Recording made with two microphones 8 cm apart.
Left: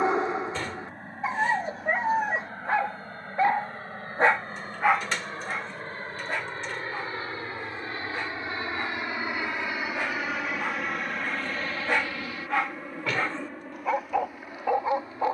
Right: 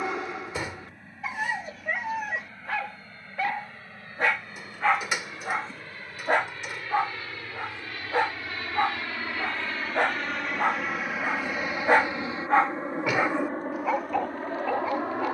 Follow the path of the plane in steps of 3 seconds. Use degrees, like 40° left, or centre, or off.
50° left, 50° left, 30° left, centre, 40° right.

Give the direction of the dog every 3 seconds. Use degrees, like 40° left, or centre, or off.
30° left, 10° left, 70° right, 60° right, centre.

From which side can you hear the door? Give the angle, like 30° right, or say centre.
10° right.